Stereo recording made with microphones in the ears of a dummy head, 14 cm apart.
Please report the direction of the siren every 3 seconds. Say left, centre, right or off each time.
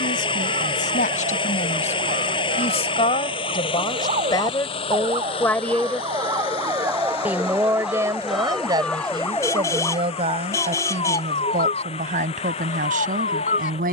right, right, centre, left, left.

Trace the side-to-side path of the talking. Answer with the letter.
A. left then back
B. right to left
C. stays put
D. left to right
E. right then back
D.